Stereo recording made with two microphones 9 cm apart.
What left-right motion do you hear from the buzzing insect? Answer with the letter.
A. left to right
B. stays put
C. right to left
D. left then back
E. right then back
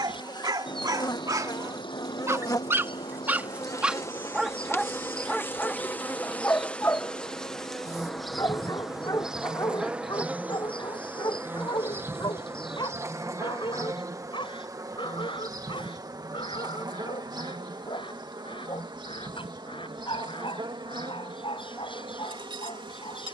A.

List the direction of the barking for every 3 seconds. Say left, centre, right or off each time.
right, centre, left, left, left, left, left, left.